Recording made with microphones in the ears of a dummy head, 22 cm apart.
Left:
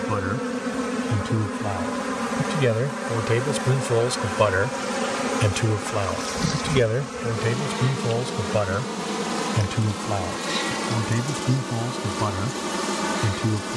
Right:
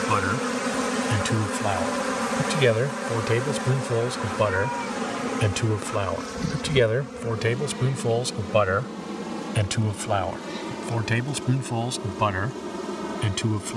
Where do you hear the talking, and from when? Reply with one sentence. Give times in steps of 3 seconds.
You can hear the talking on the right from 0 s, in the centre from 3 s and on the right from 6 s.